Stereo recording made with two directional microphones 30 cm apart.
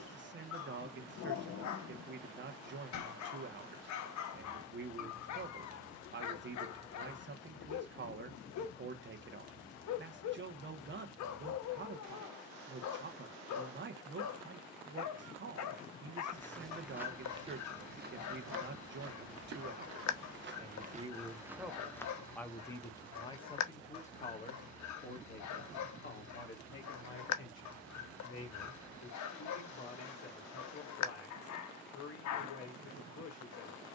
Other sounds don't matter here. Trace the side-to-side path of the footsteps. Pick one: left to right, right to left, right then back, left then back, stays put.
right then back.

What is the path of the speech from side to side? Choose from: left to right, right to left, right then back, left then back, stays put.
right to left.